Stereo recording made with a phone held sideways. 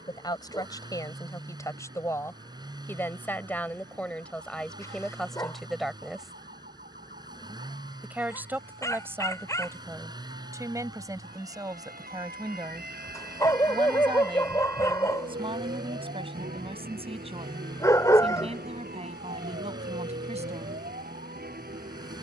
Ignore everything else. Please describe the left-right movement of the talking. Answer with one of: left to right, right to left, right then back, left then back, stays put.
left to right.